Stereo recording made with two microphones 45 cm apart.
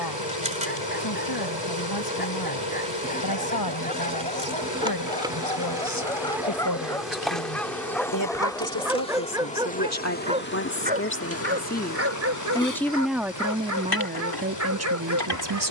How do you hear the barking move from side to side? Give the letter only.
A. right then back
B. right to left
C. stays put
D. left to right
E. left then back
D.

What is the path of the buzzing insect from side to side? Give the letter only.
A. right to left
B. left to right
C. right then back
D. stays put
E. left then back
A.